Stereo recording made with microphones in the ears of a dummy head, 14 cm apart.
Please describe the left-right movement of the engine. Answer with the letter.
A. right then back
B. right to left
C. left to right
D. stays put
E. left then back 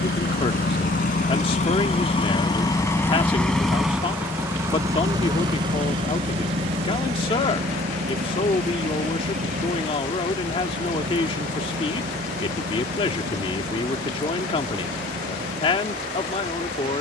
C.